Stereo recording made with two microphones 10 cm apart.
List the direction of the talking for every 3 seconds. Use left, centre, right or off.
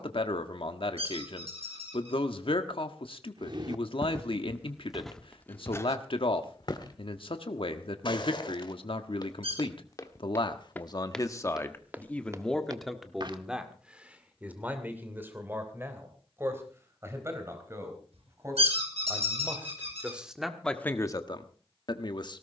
left, left, left, left, centre, right, centre, left.